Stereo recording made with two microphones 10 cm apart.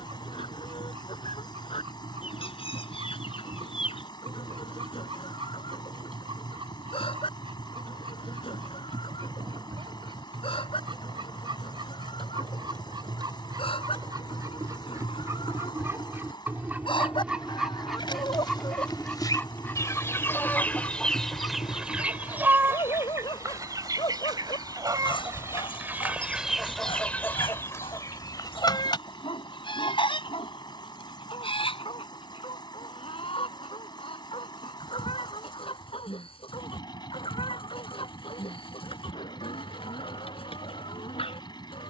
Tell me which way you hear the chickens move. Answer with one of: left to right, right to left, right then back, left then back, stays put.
right then back.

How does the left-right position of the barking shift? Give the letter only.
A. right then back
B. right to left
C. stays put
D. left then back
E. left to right
B.